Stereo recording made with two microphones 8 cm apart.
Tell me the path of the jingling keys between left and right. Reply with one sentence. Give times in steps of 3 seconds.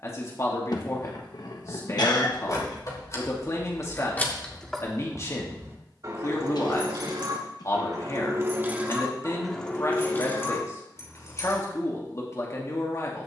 In this clip you hear the jingling keys on the left from 0 s, in the centre from 3 s, on the right from 6 s, on the left from 9 s and not at all from 12 s.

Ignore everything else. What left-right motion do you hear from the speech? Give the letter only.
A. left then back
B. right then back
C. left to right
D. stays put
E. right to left
D.